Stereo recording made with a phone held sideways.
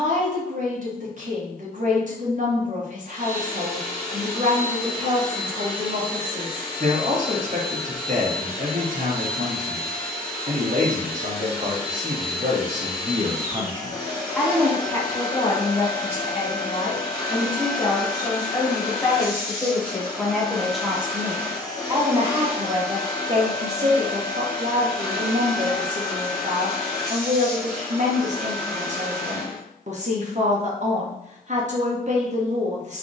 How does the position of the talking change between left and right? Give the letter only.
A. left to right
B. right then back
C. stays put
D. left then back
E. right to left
D.